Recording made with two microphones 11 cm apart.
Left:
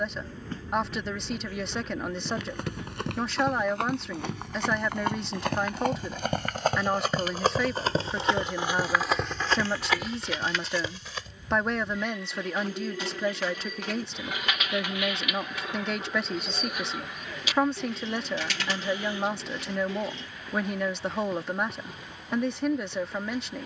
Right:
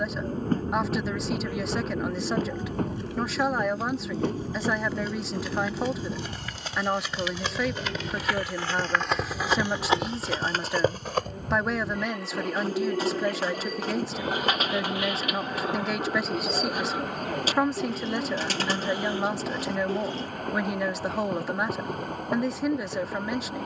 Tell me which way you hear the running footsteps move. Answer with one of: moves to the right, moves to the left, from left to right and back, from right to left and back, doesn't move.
moves to the right.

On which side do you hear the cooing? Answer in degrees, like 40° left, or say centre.
40° right.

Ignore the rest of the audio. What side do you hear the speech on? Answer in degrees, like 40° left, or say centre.
centre.